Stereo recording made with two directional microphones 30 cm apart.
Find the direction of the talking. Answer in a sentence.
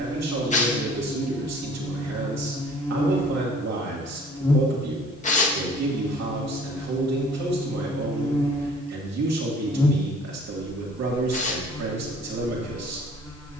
You can hear the talking on the right.